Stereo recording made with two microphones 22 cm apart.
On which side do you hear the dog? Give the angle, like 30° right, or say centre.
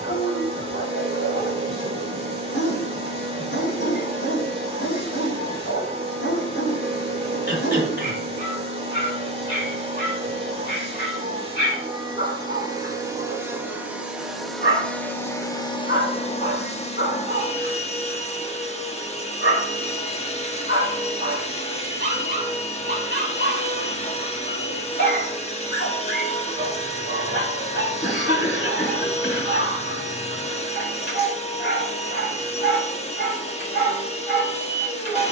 50° left.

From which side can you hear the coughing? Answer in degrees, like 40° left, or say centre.
50° left.